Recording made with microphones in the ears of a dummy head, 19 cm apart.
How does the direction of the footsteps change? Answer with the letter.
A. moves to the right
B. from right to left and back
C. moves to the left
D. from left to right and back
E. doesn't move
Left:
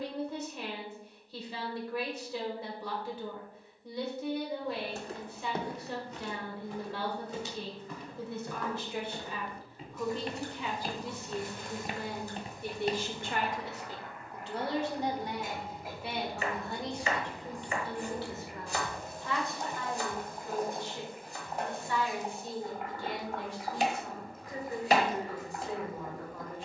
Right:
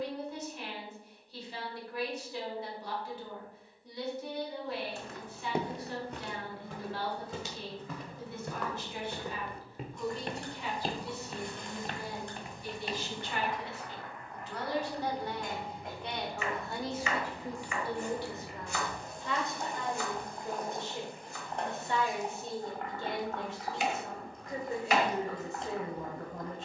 D.